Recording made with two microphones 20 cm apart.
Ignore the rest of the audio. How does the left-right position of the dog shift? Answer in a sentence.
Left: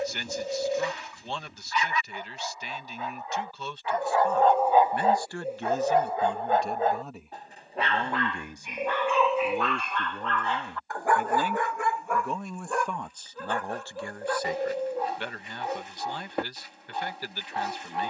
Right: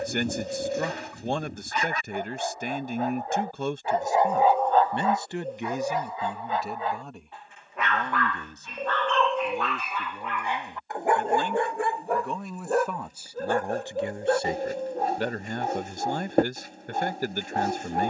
You can hear the dog go left and come back.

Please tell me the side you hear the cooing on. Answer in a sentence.
In this clip you hear the cooing in the centre.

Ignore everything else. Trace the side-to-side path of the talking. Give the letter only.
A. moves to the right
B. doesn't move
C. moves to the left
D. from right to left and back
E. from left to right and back
D.